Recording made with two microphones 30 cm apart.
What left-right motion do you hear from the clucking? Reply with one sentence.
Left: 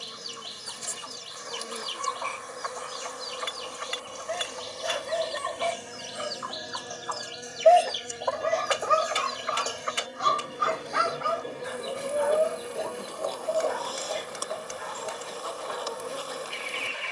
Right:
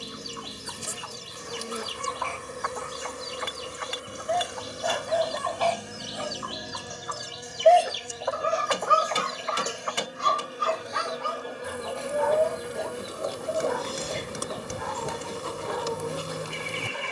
You can hear the clucking move from right to left and back again.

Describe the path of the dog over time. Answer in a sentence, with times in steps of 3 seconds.
In this clip you hear the dog on the left from 0 s, in the centre from 6 s and on the right from 9 s.